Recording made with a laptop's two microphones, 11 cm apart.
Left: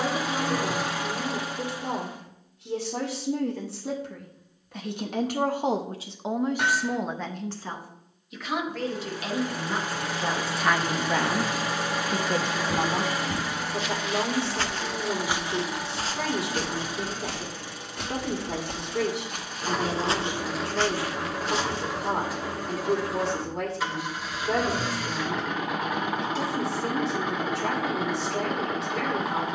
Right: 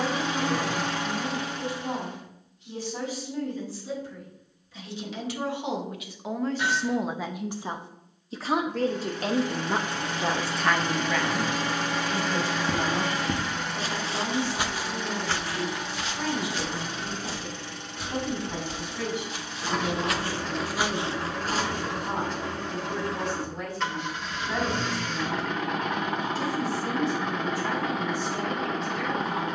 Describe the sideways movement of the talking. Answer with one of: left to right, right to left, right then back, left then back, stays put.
right then back.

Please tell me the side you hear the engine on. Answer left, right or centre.
centre.